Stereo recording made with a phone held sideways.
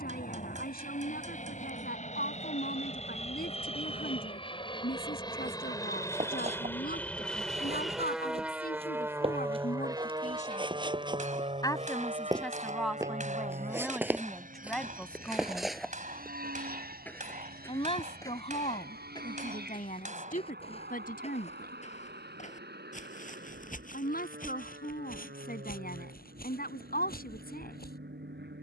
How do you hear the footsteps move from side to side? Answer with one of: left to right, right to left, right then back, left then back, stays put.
right to left.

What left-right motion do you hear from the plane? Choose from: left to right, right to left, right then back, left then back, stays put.
left to right.